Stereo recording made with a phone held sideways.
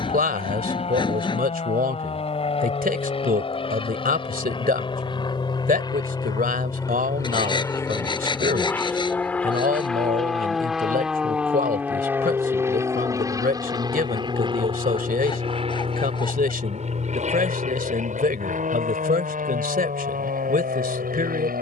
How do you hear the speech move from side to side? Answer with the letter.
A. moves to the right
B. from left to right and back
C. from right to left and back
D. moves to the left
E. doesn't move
E.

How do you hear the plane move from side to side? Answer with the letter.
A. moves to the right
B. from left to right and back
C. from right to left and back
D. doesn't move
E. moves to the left
A.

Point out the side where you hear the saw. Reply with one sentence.
In this clip you hear the saw on the left.